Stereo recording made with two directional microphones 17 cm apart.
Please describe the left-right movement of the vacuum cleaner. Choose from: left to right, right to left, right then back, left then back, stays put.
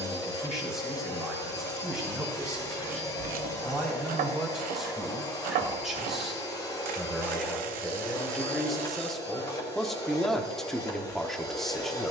stays put.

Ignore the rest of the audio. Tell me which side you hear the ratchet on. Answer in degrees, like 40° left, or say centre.
60° right.